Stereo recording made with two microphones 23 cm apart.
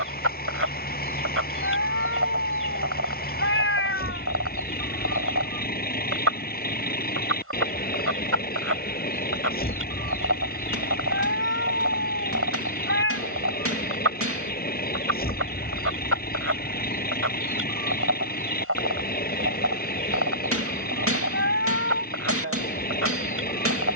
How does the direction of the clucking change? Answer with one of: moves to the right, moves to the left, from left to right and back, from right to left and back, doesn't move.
doesn't move.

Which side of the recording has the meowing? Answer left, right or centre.
left.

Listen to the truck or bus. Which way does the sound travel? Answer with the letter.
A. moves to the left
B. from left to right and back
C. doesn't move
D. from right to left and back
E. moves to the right
C.